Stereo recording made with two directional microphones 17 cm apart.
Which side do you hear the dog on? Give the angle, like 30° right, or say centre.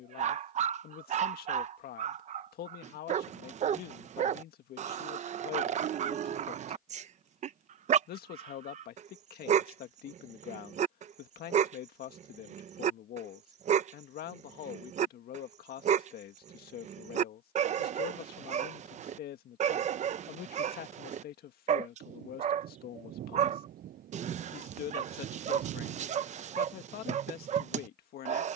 40° right.